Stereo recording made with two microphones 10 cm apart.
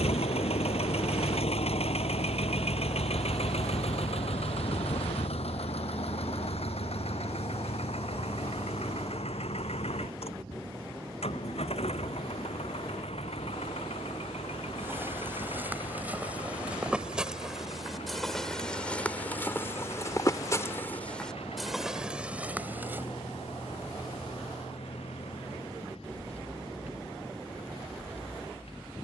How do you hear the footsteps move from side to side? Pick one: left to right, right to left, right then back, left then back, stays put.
left then back.